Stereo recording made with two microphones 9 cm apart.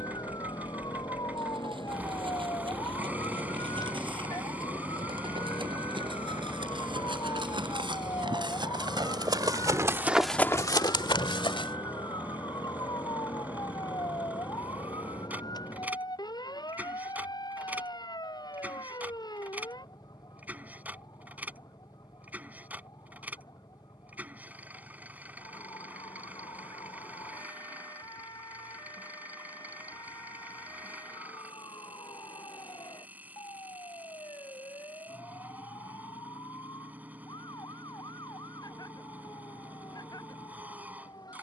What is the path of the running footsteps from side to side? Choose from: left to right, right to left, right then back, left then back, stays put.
right to left.